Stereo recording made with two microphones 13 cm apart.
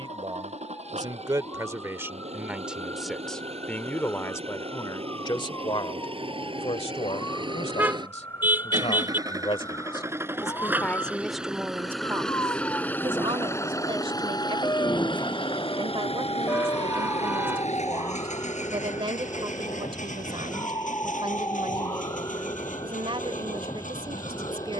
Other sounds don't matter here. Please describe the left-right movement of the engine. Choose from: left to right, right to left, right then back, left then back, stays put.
right to left.